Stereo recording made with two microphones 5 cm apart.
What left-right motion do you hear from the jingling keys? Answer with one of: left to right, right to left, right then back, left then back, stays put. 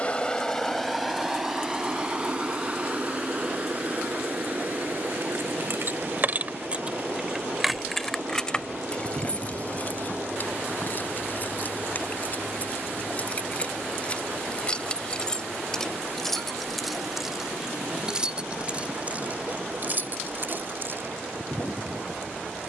left then back.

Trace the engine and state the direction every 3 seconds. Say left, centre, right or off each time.
centre, right, right, right, right, right, right, right.